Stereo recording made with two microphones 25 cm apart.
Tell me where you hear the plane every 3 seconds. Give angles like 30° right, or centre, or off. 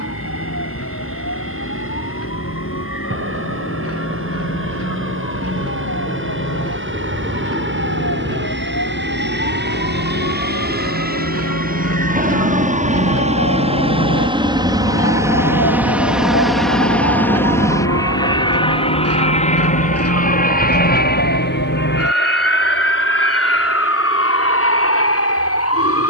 70° right, 60° right, 50° right, 40° right, 30° right, centre, 30° left, 50° left, 60° left.